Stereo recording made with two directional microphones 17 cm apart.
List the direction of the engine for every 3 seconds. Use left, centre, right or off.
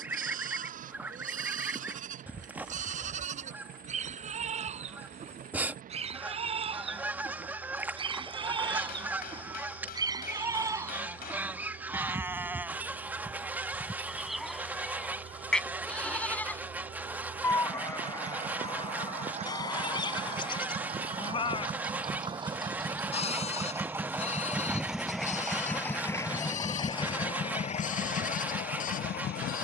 right, right, right, right, right, right, right, right, centre, left.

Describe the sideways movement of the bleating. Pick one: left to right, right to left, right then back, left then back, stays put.
right to left.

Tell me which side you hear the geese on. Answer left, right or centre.
centre.